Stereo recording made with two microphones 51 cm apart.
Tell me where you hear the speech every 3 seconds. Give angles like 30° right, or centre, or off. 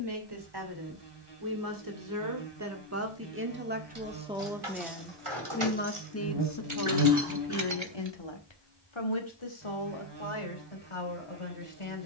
40° right, 10° right, 50° left, 70° left.